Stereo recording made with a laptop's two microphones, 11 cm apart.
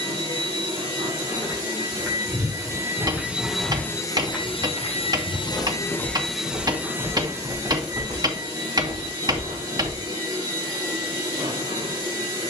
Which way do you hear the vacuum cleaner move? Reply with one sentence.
You can hear the vacuum cleaner move from right to left and back again.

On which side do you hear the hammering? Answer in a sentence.
In this clip you hear the hammering on the right.